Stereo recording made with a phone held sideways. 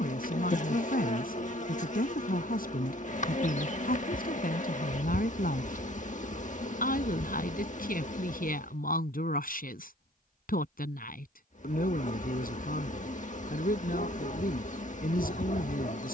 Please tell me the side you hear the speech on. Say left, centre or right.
left.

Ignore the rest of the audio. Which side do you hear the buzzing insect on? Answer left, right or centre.
left.